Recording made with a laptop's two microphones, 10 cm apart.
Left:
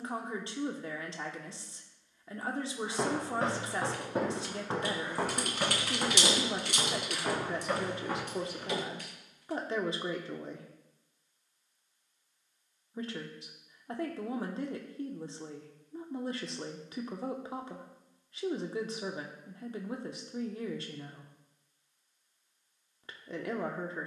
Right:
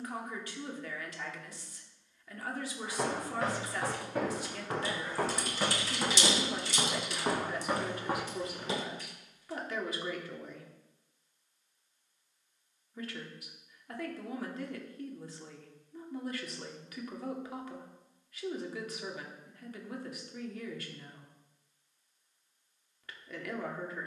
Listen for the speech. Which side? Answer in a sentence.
In this clip you hear the speech on the left.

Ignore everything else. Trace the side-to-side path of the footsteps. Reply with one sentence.
You can hear the footsteps travel towards the right.